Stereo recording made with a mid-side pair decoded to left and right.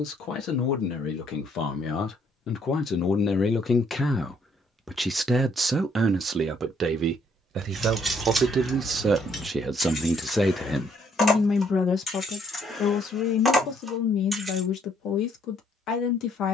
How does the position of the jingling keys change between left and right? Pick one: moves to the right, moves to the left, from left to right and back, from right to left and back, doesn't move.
from right to left and back.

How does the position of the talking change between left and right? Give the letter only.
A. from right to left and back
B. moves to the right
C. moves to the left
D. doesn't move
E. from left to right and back
E.